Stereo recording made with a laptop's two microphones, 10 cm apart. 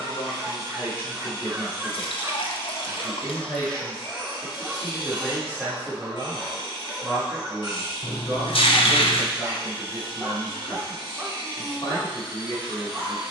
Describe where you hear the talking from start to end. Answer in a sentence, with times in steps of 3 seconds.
You can hear the talking on the left from 0 s, in the centre from 3 s and on the left from 9 s.